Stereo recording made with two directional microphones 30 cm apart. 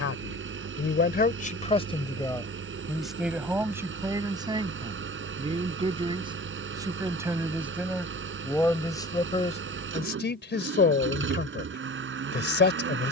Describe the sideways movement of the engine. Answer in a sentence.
In this clip you hear the engine stay in one place.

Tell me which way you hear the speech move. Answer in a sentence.
In this clip you hear the speech move from left to right and back again.